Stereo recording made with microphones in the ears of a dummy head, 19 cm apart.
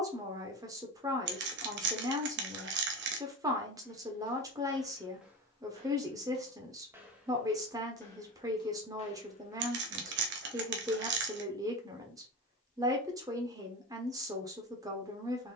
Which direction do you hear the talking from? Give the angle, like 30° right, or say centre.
20° right.